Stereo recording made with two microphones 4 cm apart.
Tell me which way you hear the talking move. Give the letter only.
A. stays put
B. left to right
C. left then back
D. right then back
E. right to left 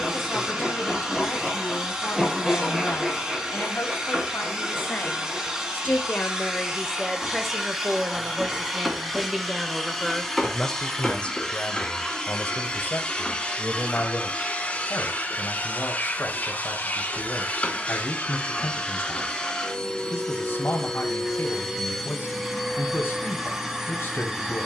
D.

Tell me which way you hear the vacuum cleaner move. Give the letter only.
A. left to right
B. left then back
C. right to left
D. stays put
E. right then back
B.